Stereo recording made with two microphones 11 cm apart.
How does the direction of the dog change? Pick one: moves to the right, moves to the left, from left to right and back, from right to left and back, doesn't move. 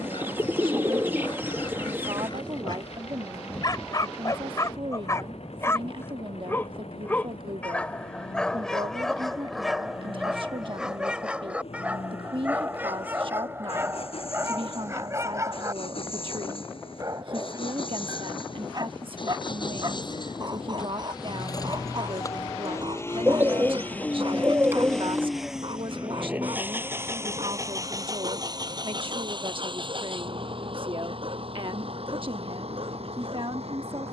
moves to the right.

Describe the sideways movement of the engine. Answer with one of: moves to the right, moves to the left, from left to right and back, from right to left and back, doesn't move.
moves to the right.